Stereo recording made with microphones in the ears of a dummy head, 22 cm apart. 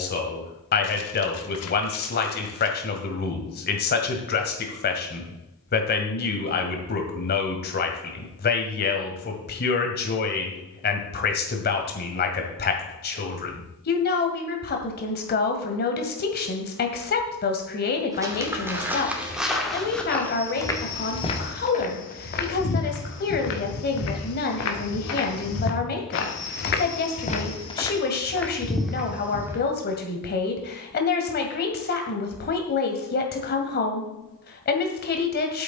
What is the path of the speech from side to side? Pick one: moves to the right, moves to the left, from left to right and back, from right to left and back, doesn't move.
doesn't move.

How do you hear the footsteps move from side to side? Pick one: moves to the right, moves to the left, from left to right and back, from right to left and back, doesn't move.
from right to left and back.